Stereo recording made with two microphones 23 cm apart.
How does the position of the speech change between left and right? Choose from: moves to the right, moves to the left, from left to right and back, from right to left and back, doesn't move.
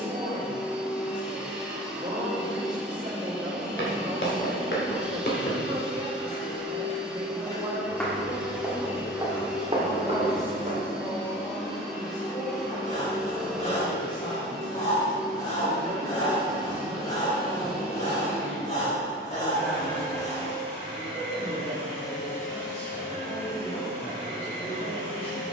moves to the left.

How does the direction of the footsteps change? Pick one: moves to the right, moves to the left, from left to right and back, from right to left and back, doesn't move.
moves to the right.